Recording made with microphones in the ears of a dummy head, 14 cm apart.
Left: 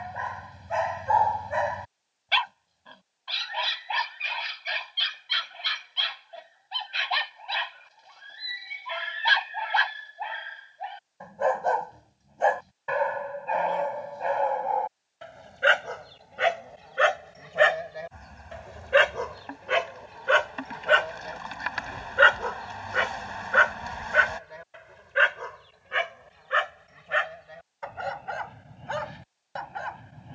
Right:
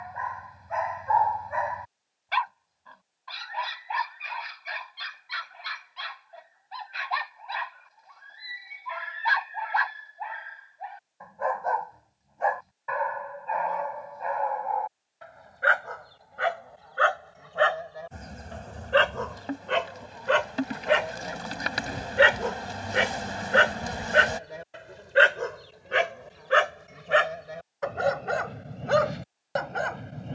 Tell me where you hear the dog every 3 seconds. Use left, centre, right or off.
left, left, left, left, left, left, centre, right, right, right.